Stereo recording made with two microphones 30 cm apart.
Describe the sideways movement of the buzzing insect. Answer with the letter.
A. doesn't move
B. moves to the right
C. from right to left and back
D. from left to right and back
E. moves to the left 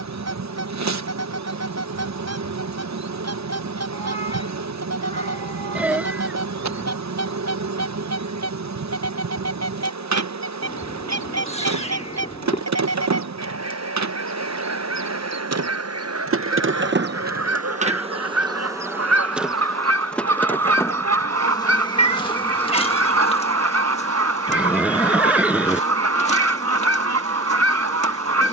E.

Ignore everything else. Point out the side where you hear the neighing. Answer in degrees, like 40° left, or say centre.
centre.